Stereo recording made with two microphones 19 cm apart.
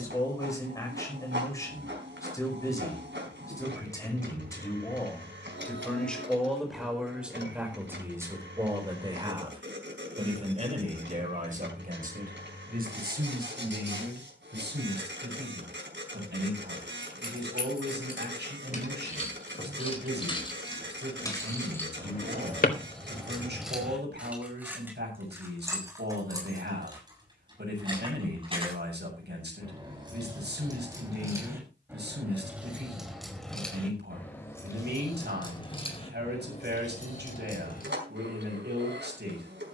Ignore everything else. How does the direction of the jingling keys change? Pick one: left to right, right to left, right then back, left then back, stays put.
right then back.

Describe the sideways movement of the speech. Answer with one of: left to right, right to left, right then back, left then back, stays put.
left to right.